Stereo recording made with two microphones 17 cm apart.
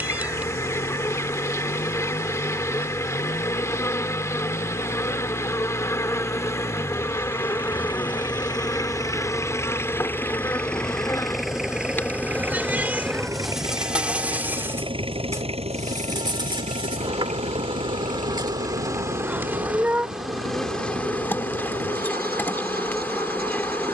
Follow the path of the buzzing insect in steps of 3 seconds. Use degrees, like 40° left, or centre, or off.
20° left, 20° left, 20° left, 20° left, centre, 30° right, 10° right, 10° left.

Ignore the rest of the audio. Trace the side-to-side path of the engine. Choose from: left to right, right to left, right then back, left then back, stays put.
left to right.